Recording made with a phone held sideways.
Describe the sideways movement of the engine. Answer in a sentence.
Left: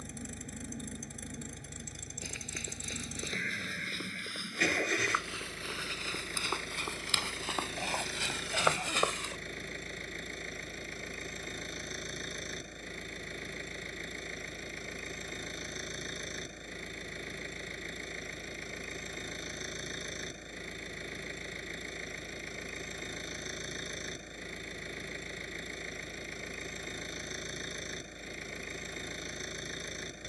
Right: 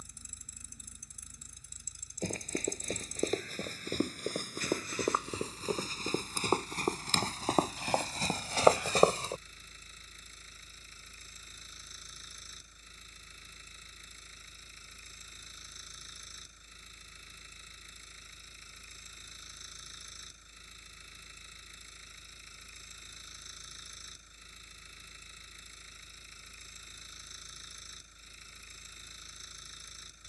In this clip you hear the engine stay put.